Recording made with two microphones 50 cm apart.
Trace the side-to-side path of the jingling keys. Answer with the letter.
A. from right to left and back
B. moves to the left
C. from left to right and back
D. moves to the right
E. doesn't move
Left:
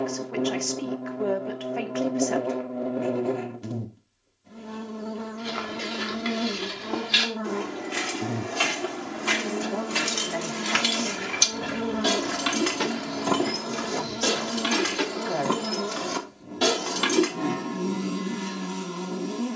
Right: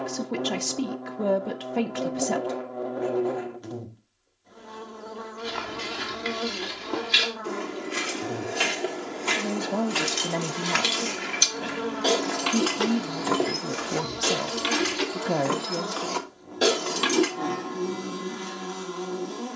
A.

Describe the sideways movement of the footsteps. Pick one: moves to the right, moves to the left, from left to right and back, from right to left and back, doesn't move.
from right to left and back.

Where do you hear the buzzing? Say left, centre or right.
left.